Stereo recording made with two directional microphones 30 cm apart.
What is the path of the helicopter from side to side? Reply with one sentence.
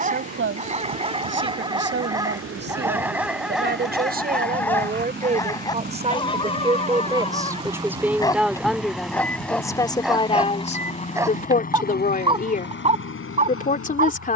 You can hear the helicopter travel towards the left.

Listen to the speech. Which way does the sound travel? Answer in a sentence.
In this clip you hear the speech move from right to left.